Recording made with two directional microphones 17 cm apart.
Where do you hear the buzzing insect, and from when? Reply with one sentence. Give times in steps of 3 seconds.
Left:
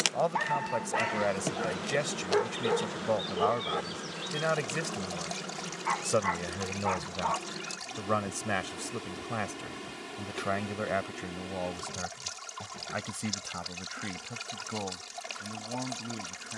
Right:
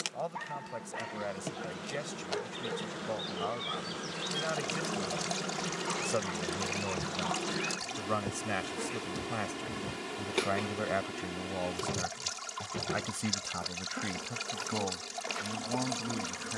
You can hear the buzzing insect on the left from 0 s, in the centre from 3 s and on the right from 6 s.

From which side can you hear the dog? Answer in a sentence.
You can hear the dog on the left.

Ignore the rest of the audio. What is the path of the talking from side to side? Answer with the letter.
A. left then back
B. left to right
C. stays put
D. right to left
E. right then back
B.